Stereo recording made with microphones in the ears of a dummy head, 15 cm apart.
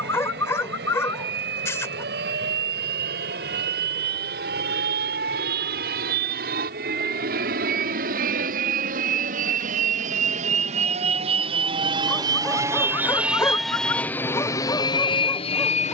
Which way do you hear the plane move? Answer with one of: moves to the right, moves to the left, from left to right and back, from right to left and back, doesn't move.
moves to the left.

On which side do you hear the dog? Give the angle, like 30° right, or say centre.
20° left.